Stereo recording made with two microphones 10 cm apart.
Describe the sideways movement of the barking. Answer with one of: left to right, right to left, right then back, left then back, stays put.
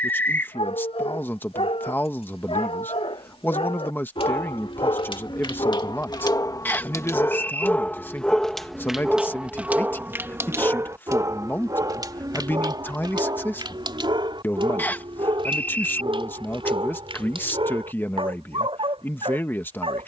left to right.